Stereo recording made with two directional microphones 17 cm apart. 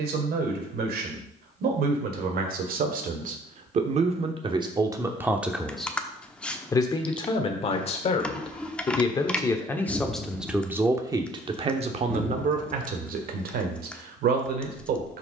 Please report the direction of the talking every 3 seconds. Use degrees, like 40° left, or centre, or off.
60° right, 30° right, 30° left, 10° right, 60° right.